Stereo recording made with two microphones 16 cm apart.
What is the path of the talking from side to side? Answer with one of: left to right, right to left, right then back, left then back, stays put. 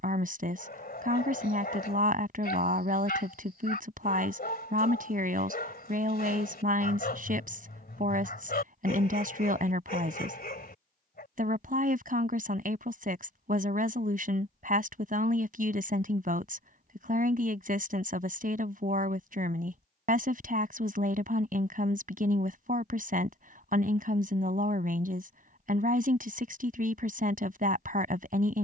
stays put.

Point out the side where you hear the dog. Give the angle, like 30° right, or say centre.
70° left.